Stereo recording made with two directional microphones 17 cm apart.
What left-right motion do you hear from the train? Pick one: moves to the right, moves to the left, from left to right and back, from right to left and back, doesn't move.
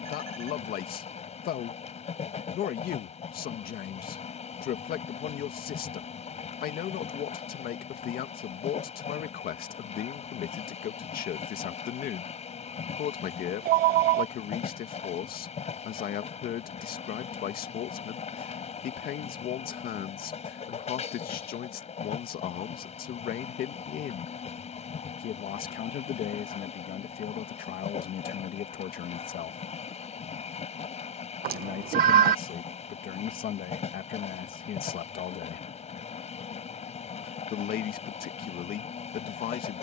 doesn't move.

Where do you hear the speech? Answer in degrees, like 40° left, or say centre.
60° left.